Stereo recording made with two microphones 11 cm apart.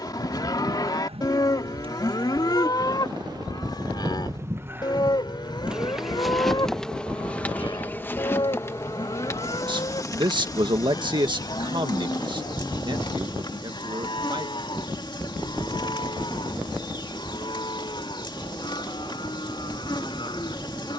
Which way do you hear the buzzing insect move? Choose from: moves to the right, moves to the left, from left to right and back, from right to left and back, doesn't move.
moves to the left.